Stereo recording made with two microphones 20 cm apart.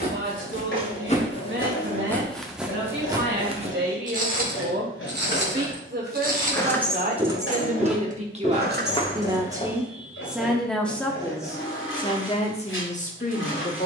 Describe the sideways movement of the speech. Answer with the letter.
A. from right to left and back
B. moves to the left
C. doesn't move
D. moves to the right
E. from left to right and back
B.